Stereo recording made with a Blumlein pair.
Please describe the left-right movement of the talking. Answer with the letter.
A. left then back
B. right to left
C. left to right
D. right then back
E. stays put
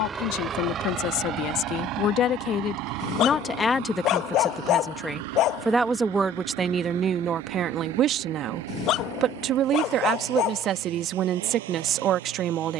C.